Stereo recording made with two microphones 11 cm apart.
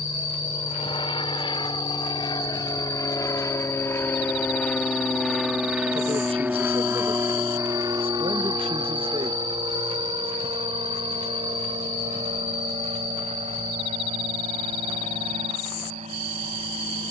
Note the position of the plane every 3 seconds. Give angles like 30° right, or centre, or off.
50° left, 10° left, 30° right, 50° right, 60° right, 70° right.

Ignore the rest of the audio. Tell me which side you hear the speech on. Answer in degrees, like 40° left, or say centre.
60° right.